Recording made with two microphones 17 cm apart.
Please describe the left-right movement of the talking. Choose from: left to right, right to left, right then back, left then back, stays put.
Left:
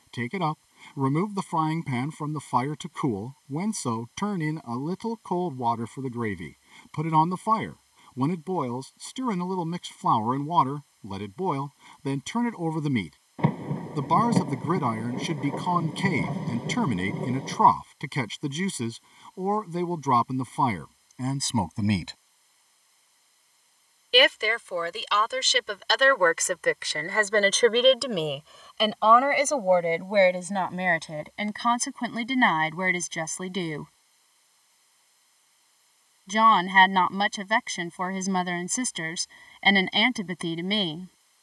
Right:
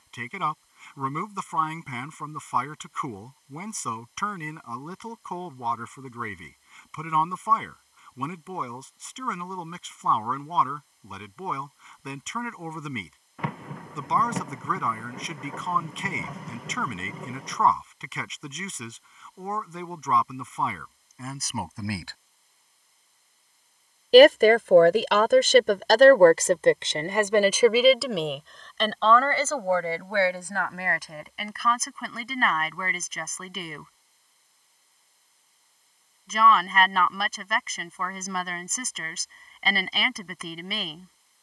right then back.